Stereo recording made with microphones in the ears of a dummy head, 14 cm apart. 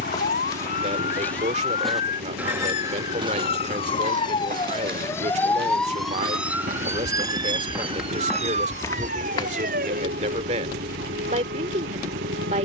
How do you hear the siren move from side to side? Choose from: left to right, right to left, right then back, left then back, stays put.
left to right.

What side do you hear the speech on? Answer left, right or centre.
right.